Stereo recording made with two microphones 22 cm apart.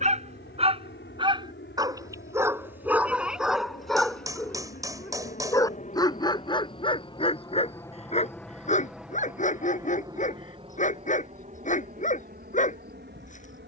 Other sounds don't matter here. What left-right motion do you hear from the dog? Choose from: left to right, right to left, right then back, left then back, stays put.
right to left.